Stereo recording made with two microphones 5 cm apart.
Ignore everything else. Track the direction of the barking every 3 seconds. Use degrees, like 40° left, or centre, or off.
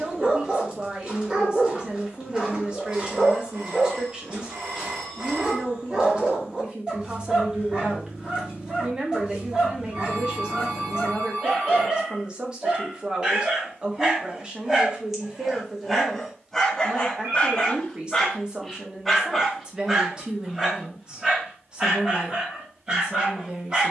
20° right, 20° right, 20° right, 20° right, 20° right, 10° left, centre, 20° right.